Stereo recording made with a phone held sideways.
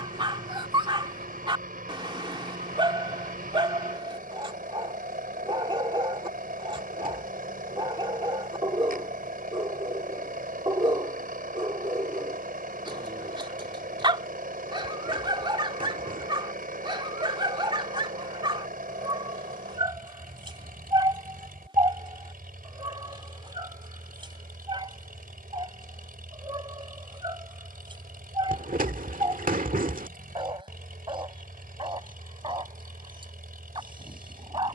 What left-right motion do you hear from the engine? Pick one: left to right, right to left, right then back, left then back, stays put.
stays put.